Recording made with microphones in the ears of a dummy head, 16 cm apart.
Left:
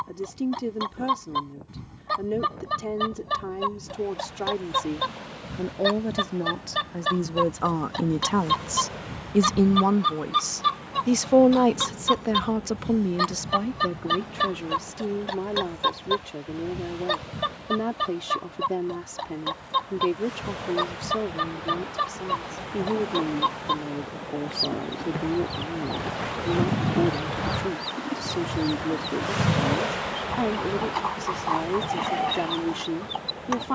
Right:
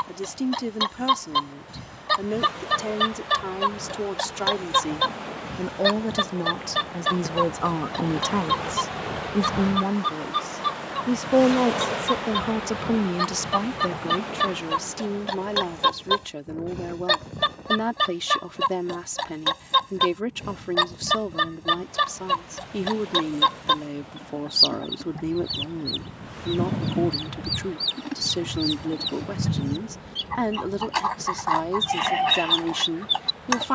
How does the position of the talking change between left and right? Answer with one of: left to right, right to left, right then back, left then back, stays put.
left then back.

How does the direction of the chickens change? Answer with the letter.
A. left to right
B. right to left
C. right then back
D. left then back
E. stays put
D.